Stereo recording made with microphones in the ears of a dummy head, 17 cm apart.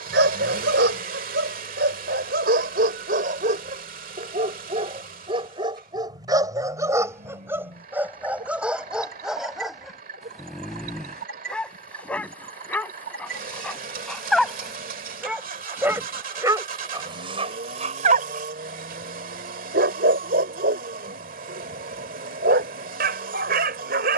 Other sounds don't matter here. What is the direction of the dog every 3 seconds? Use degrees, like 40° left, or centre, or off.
60° right, 40° right, 10° right, centre, 10° left, 20° right, 50° right, 60° right.